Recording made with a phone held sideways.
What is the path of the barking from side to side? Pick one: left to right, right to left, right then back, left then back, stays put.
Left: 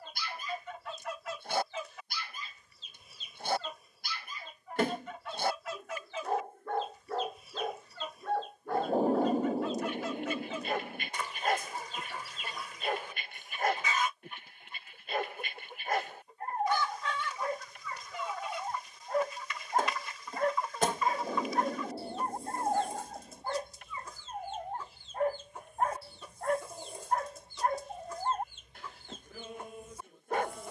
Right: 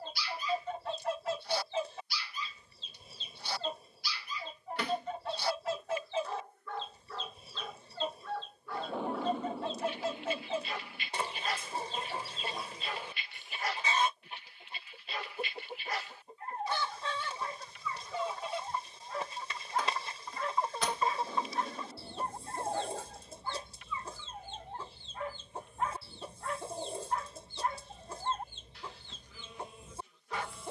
stays put.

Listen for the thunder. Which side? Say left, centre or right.
left.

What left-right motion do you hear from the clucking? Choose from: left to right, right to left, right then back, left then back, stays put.
stays put.